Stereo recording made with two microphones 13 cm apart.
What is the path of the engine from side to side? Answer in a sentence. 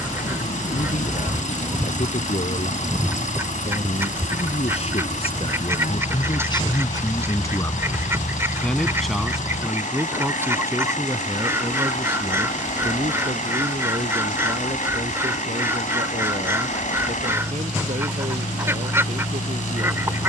You can hear the engine stay in one place.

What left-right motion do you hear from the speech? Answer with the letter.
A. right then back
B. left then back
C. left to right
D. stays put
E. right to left
C.